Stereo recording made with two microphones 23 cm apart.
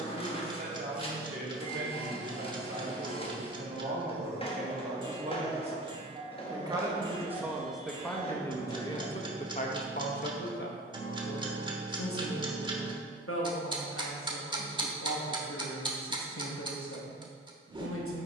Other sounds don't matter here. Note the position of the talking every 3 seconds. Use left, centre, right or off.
right, right, centre, left, left, left.